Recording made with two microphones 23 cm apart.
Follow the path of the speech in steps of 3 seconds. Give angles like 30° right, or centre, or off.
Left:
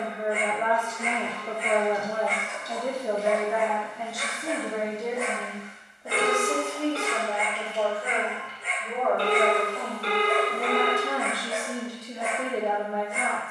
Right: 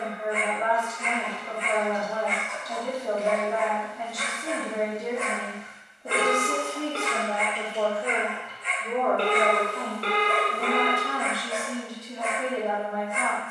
30° left, centre, 30° right, 10° right, 20° left.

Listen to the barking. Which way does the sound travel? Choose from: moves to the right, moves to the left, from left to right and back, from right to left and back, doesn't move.
doesn't move.